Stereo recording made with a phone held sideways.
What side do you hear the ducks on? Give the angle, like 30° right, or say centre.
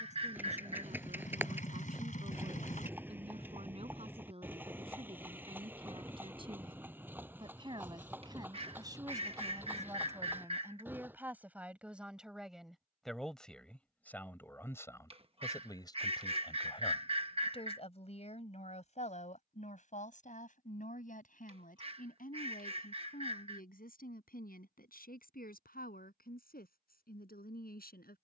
40° right.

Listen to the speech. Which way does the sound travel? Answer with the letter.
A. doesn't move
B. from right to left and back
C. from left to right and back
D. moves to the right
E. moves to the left
E.